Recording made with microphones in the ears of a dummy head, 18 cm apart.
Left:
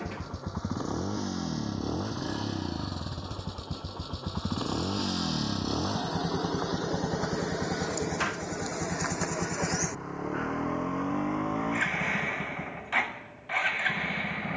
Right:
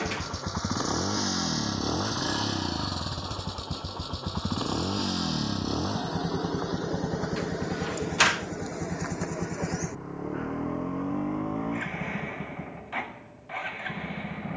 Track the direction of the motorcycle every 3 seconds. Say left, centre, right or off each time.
right, centre, left, left, left.